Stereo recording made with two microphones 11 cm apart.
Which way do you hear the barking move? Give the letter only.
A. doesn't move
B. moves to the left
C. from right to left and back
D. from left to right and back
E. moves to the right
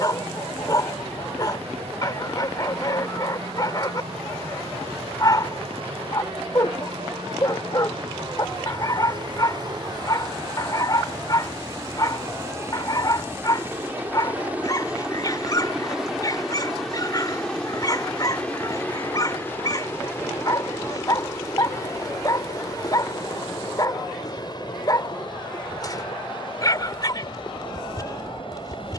A.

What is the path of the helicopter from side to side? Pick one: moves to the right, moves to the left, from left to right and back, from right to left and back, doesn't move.
moves to the left.